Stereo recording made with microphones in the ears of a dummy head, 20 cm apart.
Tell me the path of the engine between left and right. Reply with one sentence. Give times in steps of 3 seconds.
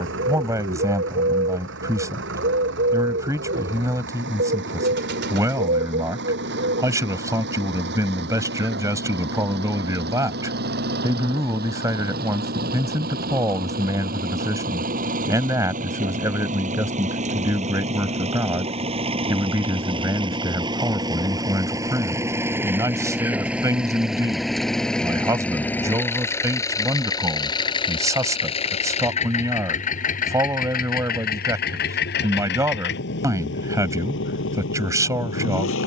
You can hear the engine on the right from 0 s, in the centre from 21 s and on the left from 27 s.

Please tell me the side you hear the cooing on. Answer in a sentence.
You can hear the cooing on the right.